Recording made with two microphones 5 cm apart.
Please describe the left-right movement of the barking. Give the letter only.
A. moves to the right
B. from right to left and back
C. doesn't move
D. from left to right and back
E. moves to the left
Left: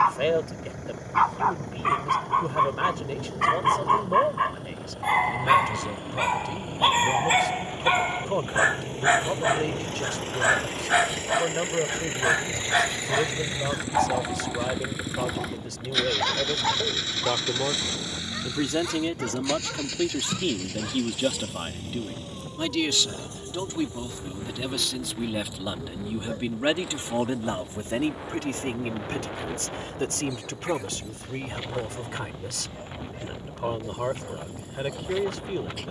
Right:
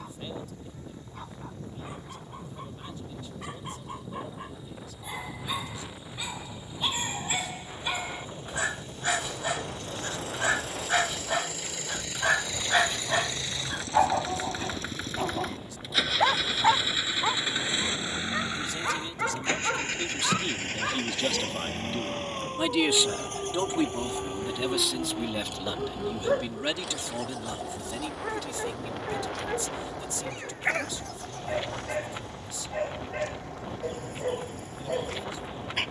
A.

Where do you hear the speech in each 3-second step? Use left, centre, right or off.
left, left, left, left, left, left, left, centre, centre, left, left, left.